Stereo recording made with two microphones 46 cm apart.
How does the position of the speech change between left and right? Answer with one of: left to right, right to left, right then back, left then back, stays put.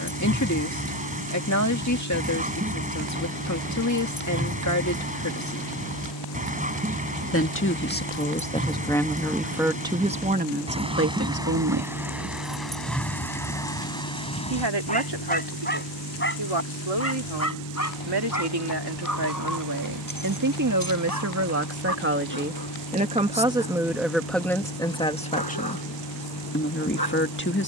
right then back.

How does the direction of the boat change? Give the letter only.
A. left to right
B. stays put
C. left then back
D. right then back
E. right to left
B.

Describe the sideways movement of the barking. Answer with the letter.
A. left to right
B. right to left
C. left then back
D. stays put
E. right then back
B.